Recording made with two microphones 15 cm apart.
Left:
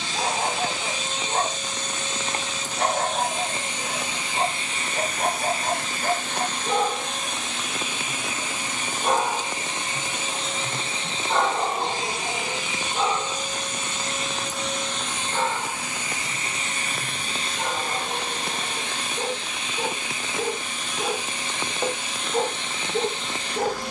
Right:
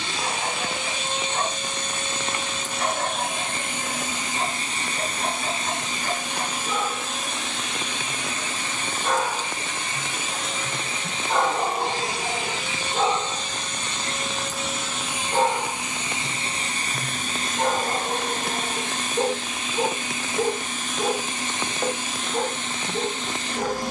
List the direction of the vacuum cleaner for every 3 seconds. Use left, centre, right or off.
right, right, centre, left, centre, right, right, right.